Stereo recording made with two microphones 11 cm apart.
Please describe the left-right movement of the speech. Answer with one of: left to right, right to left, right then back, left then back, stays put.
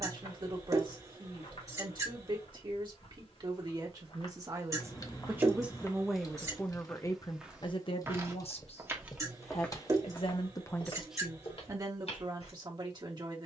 left then back.